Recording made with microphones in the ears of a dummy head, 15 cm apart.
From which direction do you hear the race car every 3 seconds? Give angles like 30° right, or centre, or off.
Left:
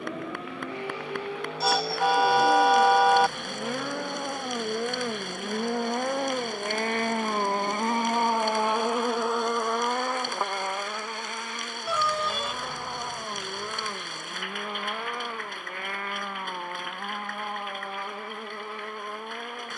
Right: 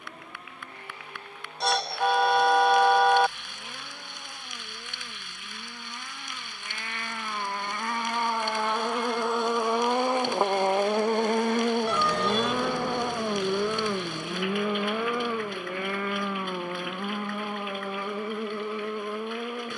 60° left, 50° left, 30° left, 20° right, 60° right, 70° right, 80° right.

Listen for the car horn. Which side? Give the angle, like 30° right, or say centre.
centre.